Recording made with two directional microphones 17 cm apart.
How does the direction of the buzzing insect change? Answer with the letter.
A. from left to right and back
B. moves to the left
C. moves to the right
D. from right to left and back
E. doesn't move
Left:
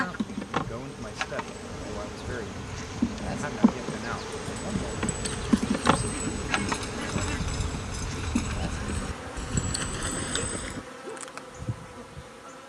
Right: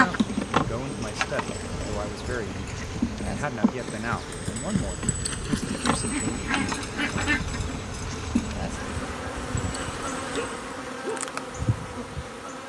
D.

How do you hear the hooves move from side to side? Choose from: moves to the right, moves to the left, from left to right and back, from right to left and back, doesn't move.
moves to the left.